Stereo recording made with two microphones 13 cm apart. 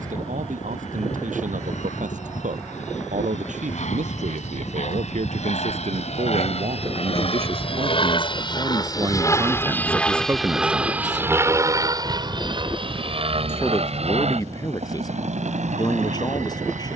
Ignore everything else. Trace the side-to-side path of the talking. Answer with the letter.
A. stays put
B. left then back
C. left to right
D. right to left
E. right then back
D.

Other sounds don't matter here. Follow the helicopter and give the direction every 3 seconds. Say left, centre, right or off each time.
left, left, left, centre, right, right.